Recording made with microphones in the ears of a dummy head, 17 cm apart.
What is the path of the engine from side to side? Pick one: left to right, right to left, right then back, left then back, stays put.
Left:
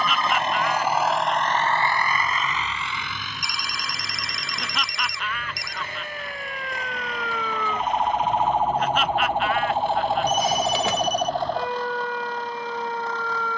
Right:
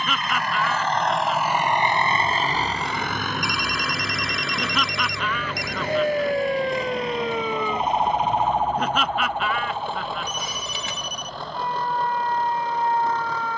left to right.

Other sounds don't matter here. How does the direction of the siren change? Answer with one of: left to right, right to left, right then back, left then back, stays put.
right to left.